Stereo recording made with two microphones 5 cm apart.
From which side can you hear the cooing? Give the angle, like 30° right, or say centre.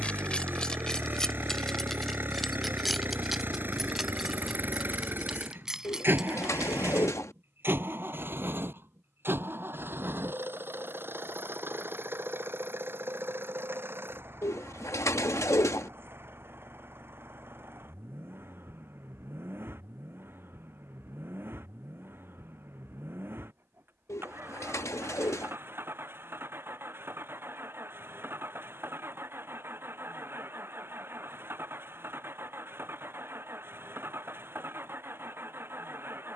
70° left.